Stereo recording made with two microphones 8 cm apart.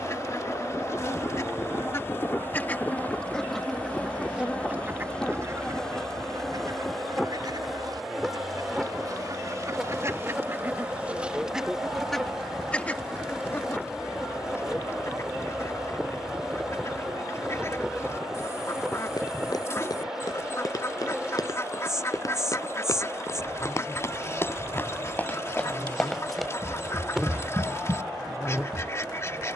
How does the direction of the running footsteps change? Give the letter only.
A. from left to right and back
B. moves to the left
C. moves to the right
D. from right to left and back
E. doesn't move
C.